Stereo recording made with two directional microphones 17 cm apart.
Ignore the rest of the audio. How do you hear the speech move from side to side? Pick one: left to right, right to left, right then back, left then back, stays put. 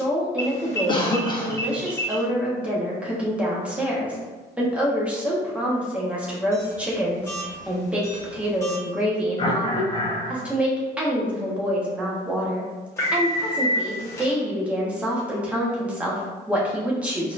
stays put.